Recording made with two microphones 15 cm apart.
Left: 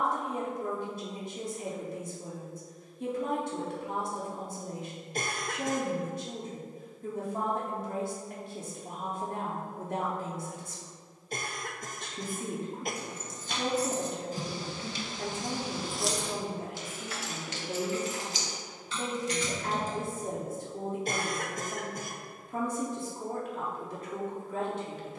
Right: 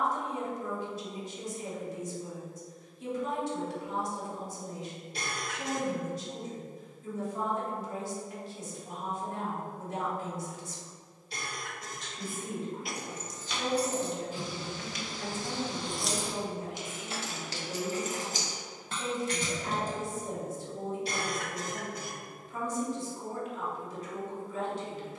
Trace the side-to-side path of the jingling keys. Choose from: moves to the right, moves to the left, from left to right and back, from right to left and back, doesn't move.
moves to the right.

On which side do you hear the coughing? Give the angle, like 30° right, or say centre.
50° left.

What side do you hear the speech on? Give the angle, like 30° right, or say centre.
60° left.